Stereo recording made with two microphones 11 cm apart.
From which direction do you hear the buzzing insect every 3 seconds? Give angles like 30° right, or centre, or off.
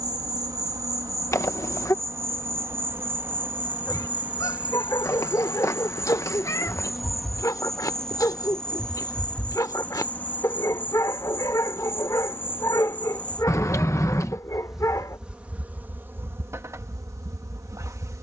30° right, 10° right, centre, 20° left, 10° left, 20° right.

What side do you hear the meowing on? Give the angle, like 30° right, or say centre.
30° left.